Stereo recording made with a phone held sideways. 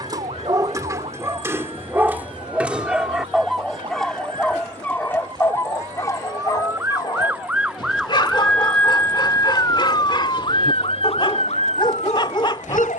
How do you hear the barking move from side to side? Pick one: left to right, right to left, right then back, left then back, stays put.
right to left.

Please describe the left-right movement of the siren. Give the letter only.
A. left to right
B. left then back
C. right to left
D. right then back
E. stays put
C.